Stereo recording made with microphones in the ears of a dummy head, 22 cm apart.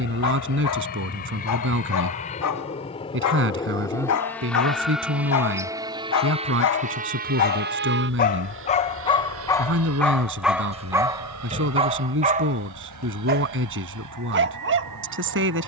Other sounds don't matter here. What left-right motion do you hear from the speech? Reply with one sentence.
In this clip you hear the speech stay put.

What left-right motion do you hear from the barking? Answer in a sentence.
You can hear the barking travel towards the right.